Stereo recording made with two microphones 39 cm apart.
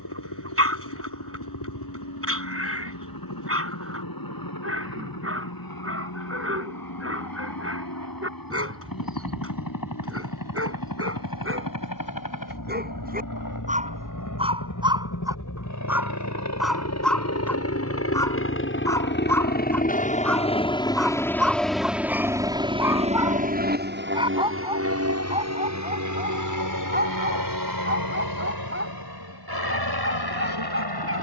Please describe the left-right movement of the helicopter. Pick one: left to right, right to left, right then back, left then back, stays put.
left to right.